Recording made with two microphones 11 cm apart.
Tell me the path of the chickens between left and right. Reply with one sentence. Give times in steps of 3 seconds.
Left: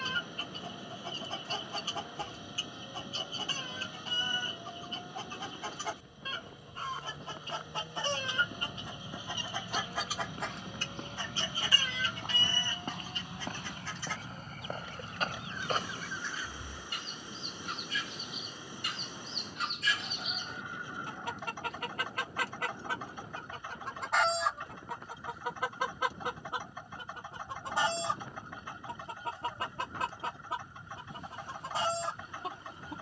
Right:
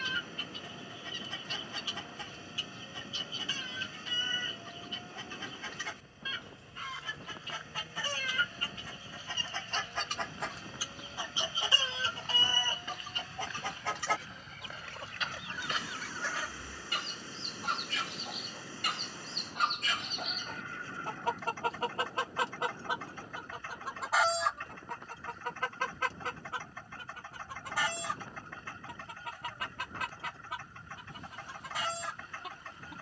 In this clip you hear the chickens on the left from 0 s, in the centre from 9 s, on the right from 12 s, in the centre from 24 s and on the left from 27 s.